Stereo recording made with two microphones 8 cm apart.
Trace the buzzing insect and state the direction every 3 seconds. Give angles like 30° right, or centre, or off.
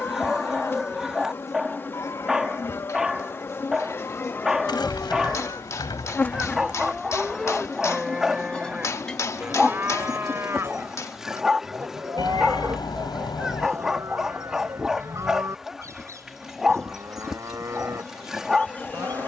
30° left, 30° left, 20° left, centre, 10° right, centre, 20° left.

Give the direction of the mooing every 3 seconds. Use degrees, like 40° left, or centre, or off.
40° left, 30° left, centre, 30° right, 40° right, 40° right, 40° right.